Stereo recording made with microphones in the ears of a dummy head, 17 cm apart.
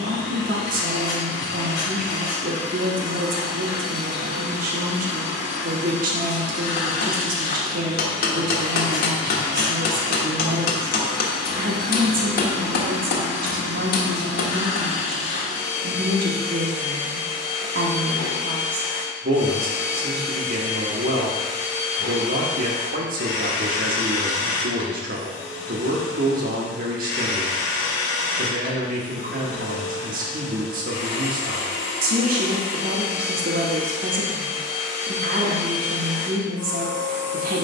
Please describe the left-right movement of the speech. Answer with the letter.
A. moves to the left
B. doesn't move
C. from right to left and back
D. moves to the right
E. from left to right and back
B.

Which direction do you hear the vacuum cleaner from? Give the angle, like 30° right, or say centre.
80° left.